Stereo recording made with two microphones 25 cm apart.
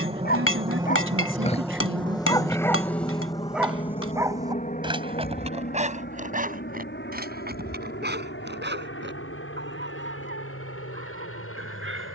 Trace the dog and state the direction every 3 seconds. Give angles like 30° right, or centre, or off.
20° left, 20° right, 40° right, 50° right.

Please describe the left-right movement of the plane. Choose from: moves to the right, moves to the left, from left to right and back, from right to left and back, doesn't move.
moves to the left.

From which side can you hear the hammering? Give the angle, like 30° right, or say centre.
70° left.